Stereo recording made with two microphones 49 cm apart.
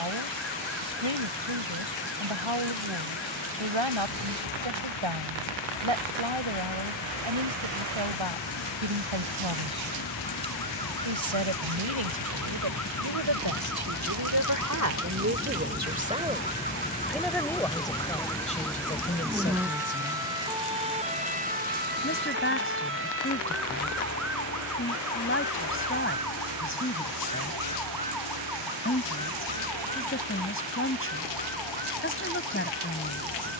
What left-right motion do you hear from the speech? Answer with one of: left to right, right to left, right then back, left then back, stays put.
right to left.